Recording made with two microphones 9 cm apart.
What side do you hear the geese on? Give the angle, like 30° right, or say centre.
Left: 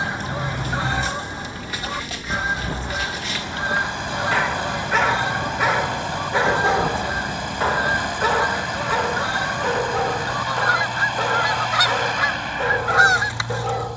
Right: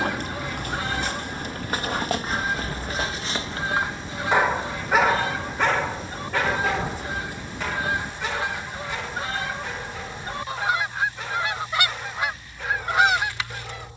20° left.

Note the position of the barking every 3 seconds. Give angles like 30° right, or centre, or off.
50° right, 10° right, 40° left, 70° left, 70° left.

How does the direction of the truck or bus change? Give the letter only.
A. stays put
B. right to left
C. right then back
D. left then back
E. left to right
A.